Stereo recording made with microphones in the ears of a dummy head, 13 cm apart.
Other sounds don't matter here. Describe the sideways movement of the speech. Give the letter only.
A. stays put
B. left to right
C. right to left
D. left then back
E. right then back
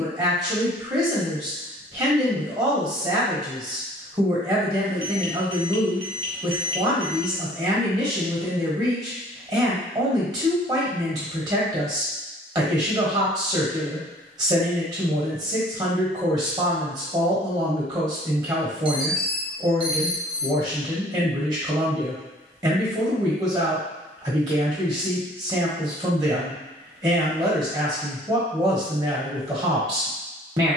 A.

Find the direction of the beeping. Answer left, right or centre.
right.